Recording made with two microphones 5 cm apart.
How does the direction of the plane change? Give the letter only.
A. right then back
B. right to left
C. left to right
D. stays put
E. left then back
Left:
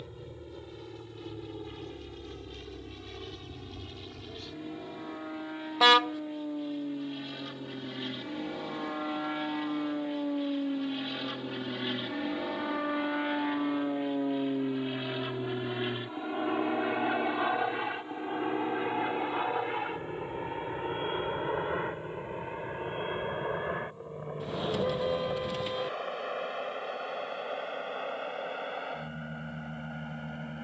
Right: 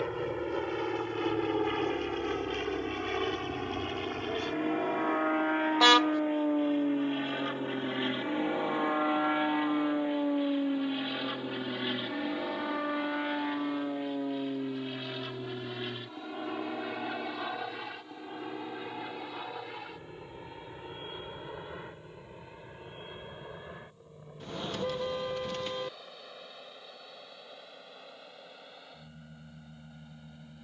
B.